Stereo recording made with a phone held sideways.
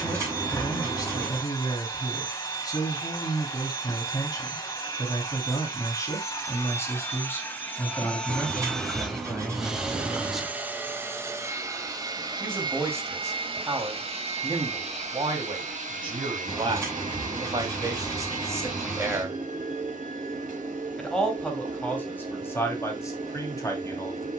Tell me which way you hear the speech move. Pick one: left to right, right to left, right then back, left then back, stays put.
right then back.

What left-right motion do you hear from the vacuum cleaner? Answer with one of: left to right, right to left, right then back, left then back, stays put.
left to right.